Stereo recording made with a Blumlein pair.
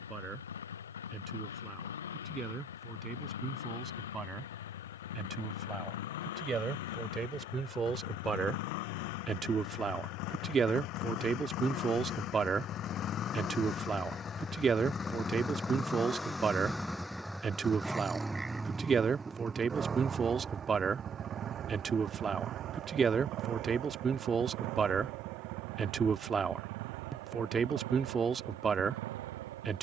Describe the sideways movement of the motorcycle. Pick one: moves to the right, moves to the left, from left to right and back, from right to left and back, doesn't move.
moves to the right.